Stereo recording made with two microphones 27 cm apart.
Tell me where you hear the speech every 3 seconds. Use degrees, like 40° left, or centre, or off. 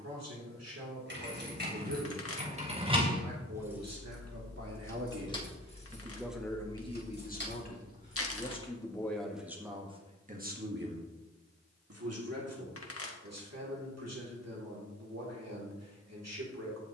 80° right, 60° right, 20° left, 20° right, 70° right, 70° right.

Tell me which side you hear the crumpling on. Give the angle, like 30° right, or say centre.
60° left.